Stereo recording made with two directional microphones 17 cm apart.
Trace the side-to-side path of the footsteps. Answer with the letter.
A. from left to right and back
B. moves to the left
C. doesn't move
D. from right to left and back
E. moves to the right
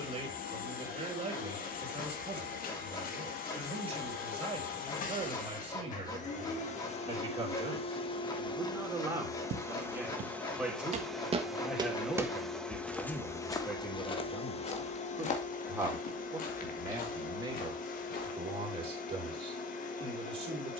B.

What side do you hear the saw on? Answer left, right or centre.
left.